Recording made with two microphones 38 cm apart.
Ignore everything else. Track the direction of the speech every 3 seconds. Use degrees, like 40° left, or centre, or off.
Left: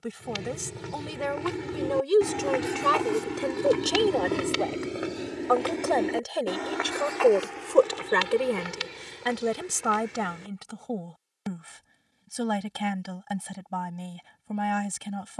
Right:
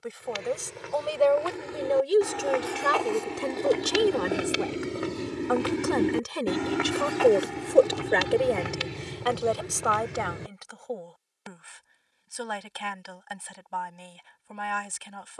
30° left, 20° right, centre, 40° left, 60° left.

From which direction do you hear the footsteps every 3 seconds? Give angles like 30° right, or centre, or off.
40° left, centre, 50° right, 70° right, off.